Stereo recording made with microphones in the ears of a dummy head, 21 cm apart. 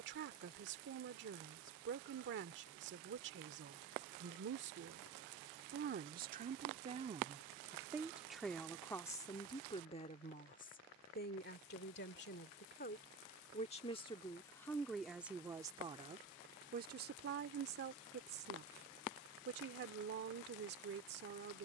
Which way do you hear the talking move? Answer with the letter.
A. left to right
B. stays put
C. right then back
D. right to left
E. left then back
E.